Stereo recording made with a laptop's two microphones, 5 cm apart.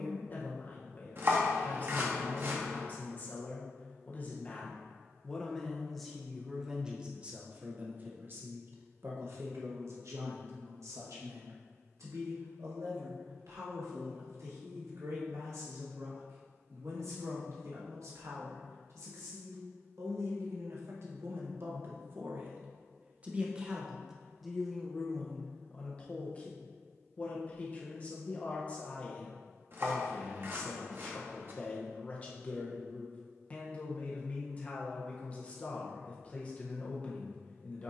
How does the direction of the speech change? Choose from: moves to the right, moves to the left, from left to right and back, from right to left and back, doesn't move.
from left to right and back.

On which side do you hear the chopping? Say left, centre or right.
right.